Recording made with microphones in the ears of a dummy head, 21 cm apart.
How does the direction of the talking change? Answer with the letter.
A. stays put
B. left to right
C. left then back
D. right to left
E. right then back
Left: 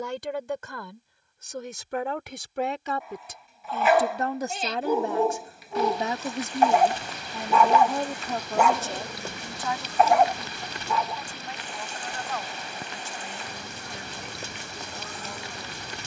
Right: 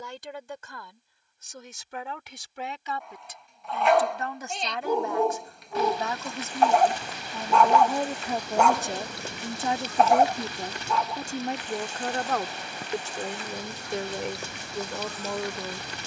B.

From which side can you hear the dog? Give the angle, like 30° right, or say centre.
centre.